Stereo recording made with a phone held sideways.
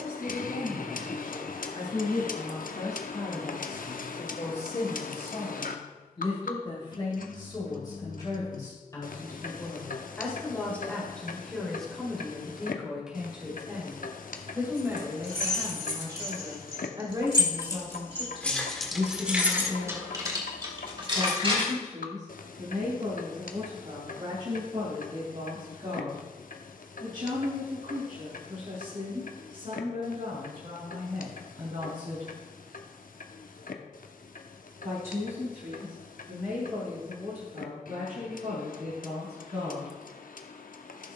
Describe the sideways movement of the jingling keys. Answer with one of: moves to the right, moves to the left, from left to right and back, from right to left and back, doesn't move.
moves to the right.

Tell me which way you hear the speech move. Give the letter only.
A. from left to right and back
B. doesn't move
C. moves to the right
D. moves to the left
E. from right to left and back
C.